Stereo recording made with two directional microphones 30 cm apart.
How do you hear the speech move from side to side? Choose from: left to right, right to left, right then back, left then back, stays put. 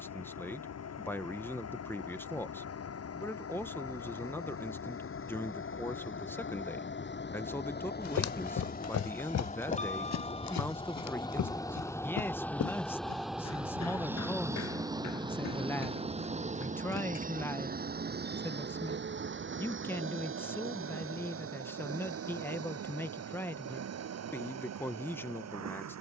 stays put.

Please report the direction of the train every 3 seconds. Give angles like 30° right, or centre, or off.
60° left, 50° left, 40° left, 20° left, centre, 20° right, 40° right, 50° right, 60° right.